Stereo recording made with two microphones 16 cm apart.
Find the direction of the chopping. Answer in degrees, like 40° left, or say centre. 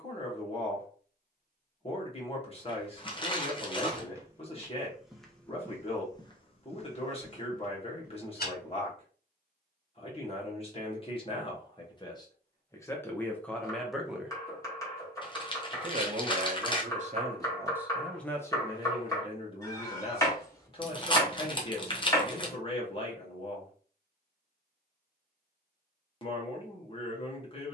20° left.